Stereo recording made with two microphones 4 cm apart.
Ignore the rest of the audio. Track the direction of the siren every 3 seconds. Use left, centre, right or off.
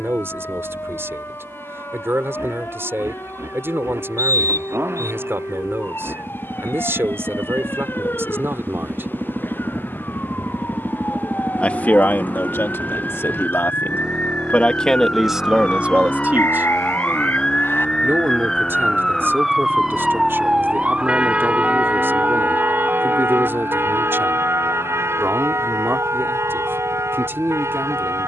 left, left, left, left, left, left, centre, right, right, right.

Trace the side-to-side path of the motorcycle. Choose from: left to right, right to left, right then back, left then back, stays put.
right to left.